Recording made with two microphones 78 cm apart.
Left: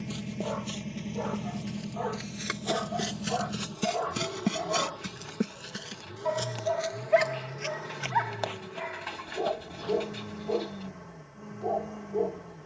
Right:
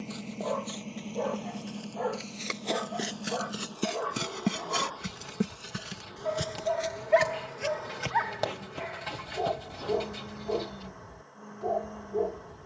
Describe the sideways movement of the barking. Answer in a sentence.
In this clip you hear the barking go from the left side to the right.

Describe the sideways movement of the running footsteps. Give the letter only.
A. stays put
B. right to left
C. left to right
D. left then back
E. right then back
C.